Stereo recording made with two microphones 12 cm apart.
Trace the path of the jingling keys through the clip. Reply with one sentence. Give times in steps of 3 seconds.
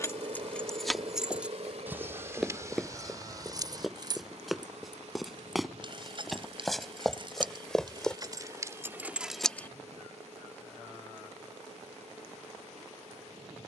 You can hear the jingling keys in the centre from 0 s, on the right from 3 s, in the centre from 9 s and not at all from 12 s.